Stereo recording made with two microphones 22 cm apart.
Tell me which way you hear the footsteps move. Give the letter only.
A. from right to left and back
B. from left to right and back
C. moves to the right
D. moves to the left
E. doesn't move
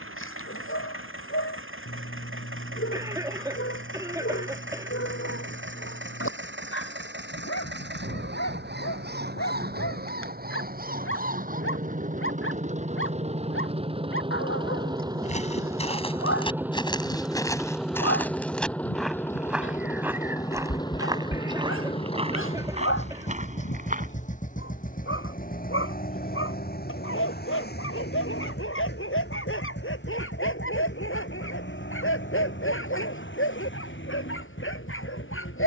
C.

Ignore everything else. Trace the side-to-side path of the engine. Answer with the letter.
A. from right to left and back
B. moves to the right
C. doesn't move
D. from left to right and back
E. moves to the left
E.